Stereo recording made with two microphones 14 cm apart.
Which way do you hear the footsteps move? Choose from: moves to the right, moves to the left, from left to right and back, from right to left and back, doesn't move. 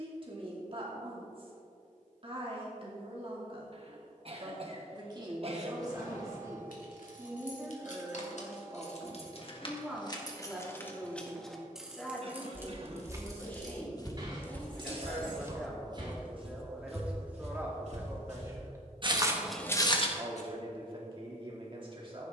from left to right and back.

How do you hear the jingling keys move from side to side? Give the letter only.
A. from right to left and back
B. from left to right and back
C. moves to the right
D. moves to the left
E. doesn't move
C.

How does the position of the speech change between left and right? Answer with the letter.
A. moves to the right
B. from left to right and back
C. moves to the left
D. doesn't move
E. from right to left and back
E.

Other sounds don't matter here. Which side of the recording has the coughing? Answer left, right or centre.
right.